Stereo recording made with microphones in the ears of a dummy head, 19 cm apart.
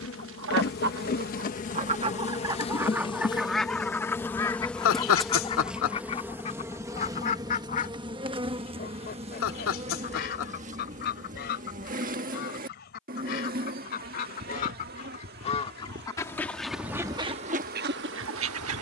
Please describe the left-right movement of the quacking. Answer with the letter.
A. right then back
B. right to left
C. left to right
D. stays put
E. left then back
E.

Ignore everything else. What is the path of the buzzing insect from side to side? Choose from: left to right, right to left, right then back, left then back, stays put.
left to right.